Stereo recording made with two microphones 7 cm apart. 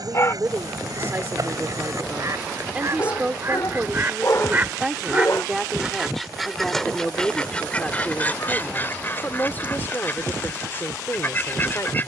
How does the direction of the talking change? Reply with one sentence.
In this clip you hear the talking move from right to left.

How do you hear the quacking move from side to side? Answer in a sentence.
In this clip you hear the quacking move to the left.